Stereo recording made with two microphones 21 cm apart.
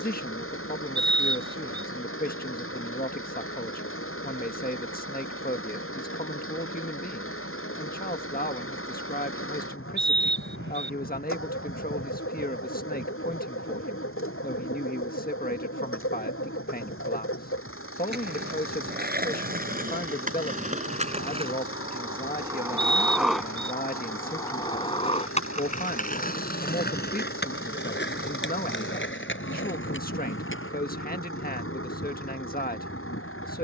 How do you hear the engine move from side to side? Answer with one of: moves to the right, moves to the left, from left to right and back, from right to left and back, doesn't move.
doesn't move.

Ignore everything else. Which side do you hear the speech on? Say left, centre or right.
left.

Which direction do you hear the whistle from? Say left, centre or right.
right.